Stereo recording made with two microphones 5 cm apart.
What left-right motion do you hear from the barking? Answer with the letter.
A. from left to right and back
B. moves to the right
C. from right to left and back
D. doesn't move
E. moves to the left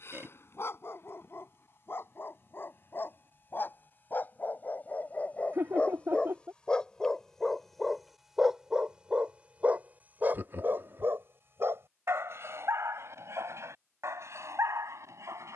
B.